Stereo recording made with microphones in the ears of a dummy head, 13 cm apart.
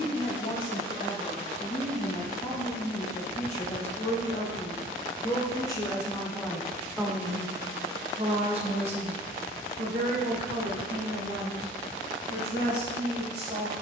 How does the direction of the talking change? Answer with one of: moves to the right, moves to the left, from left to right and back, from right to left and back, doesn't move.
moves to the right.